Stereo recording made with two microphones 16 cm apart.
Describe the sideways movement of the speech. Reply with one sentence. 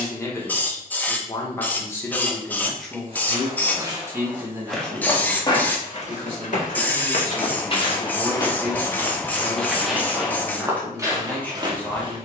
In this clip you hear the speech move from left to right and back again.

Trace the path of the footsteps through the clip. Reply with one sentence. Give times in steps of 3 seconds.
You can hear the footsteps not at all from 0 s, in the centre from 3 s, on the left from 6 s and in the centre from 9 s.